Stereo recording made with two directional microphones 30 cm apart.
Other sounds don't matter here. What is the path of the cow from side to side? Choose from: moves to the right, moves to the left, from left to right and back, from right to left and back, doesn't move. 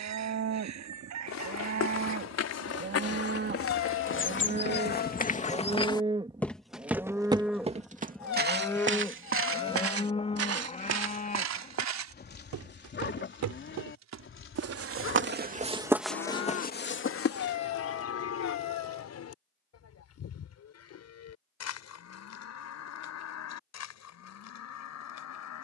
moves to the left.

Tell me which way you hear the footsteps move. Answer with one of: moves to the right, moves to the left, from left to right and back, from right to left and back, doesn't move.
from left to right and back.